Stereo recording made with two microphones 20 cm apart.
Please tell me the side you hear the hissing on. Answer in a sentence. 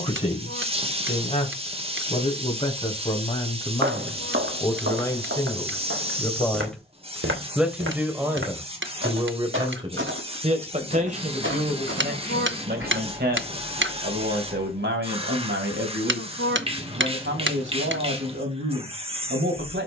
You can hear the hissing on the right.